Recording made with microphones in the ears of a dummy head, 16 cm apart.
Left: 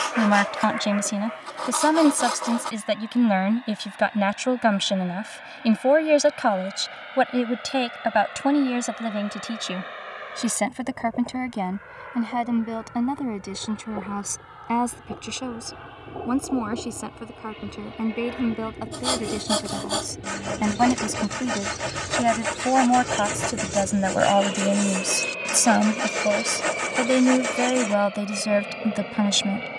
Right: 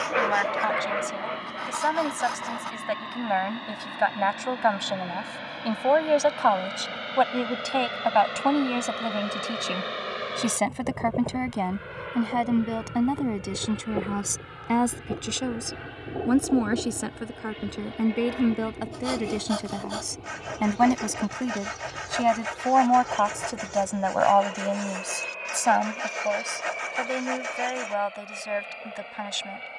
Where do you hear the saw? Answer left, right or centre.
left.